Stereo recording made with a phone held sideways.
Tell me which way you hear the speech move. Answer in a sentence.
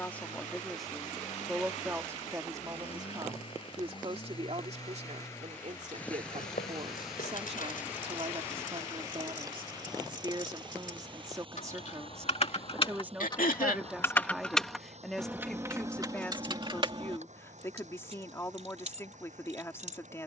In this clip you hear the speech go right and come back.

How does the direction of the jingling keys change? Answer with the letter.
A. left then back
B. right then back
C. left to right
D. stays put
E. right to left
C.